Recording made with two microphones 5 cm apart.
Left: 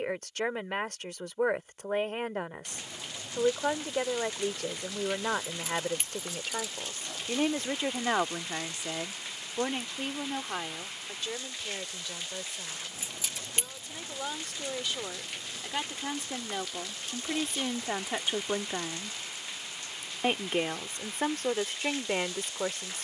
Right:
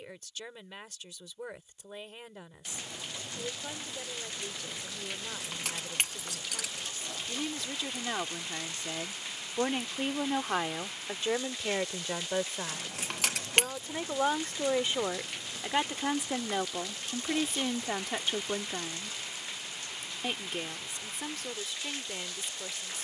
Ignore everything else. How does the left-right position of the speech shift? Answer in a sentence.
You can hear the speech move from left to right and back again.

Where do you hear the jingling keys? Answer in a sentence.
You can hear the jingling keys on the right.